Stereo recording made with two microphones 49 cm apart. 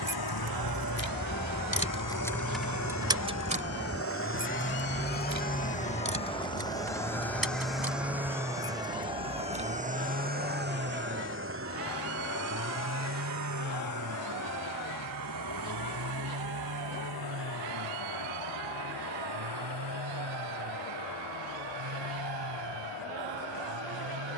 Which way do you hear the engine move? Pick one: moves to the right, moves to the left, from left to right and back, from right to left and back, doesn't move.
moves to the right.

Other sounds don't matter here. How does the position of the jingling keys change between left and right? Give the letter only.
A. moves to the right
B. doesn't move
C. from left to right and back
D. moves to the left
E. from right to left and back
A.